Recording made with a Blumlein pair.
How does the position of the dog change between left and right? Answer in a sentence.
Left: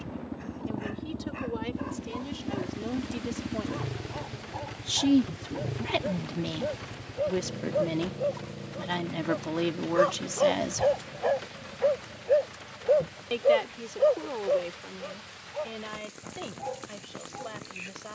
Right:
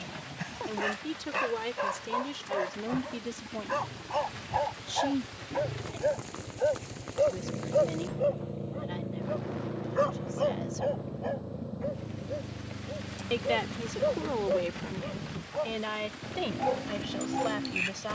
In this clip you hear the dog go left and come back.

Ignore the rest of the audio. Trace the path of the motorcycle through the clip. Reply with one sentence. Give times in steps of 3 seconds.
In this clip you hear the motorcycle on the left from 0 s, in the centre from 6 s and on the right from 9 s.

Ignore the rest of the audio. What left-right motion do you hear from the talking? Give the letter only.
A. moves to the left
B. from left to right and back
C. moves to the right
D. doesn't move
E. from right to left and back
E.